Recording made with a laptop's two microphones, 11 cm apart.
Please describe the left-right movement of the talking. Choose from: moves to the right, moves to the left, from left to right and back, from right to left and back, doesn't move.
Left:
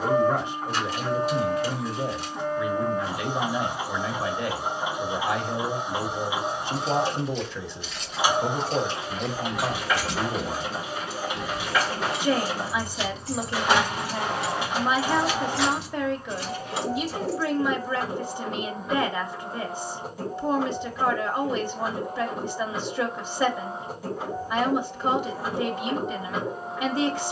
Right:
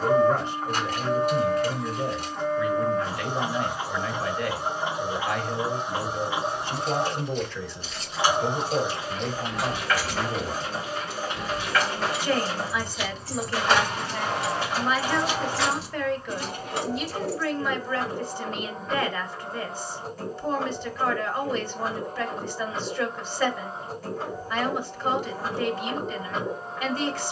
doesn't move.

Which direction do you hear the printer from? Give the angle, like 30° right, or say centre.
10° left.